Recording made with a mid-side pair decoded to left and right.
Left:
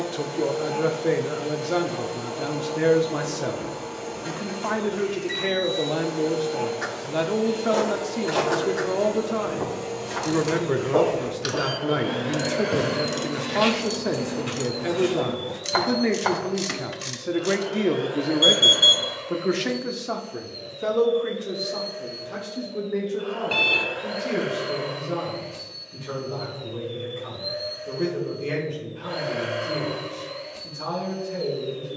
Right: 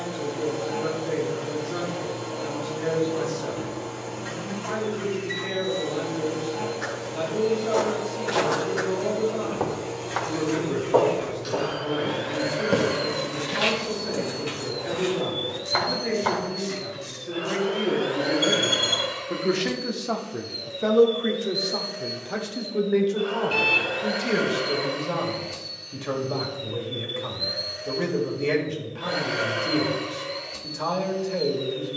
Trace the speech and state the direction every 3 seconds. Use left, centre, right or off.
left, left, left, left, left, left, centre, right, right, right, right.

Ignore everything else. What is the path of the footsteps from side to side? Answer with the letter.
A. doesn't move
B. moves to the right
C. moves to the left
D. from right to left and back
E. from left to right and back
E.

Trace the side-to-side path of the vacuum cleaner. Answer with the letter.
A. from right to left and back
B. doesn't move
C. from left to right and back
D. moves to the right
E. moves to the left
D.